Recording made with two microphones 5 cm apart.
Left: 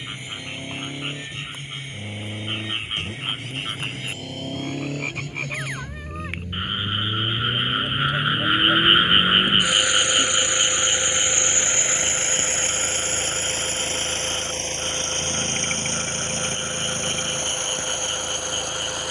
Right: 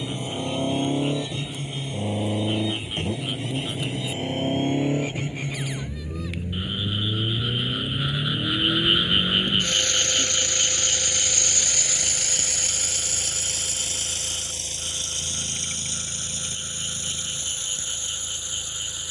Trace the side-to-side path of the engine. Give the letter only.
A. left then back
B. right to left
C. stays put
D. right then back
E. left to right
B.